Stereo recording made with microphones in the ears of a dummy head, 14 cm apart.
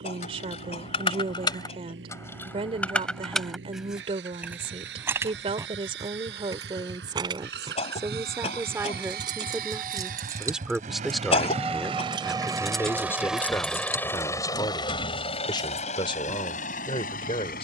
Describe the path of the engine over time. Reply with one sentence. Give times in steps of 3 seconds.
You can hear the engine on the right from 0 s, in the centre from 12 s and on the left from 15 s.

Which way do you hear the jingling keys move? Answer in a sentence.
You can hear the jingling keys go right and come back.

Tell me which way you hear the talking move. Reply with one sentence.
In this clip you hear the talking go from the right side to the left.